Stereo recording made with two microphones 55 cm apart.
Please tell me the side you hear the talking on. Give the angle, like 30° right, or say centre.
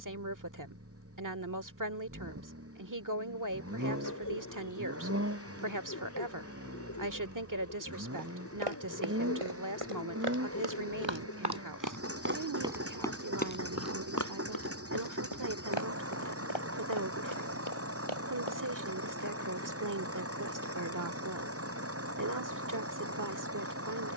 30° right.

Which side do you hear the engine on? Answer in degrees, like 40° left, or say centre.
20° right.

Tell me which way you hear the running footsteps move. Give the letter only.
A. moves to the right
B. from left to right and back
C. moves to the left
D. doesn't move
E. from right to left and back
C.